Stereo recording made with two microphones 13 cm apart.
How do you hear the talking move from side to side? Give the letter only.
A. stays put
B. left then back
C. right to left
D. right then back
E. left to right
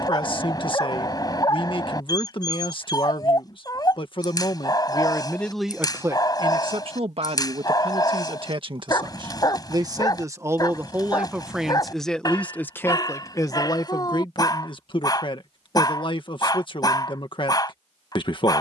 D.